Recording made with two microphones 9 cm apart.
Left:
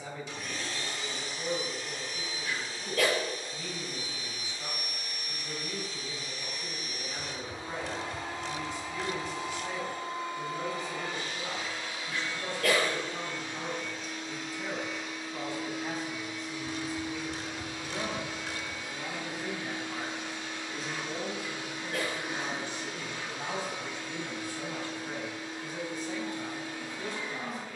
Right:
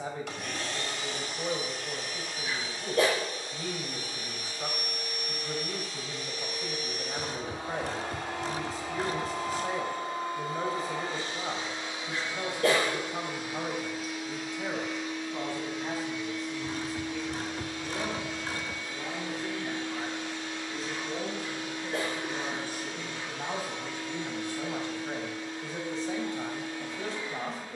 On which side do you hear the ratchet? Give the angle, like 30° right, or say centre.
40° right.